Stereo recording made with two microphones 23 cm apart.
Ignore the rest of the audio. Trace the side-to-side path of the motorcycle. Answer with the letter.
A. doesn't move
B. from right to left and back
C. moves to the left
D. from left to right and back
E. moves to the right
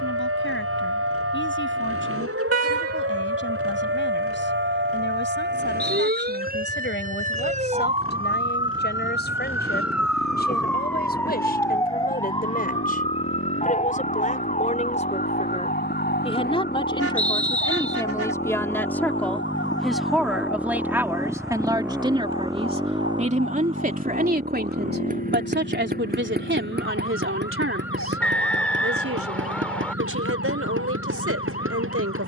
E.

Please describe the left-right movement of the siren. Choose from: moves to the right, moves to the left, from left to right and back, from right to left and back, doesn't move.
moves to the left.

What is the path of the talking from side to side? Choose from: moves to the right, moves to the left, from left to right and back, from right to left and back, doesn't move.
moves to the right.